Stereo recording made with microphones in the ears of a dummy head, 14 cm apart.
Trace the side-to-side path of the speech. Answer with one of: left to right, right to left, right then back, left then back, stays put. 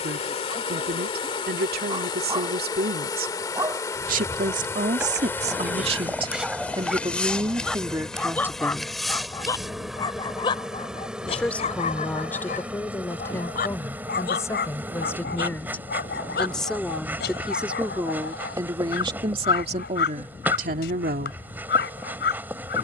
left then back.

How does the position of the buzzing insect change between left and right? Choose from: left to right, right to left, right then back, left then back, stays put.
left to right.